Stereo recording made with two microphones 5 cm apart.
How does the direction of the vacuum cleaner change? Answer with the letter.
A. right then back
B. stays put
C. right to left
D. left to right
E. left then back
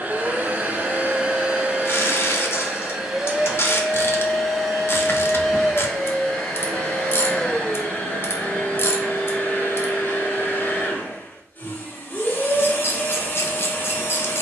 C.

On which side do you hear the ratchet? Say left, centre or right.
left.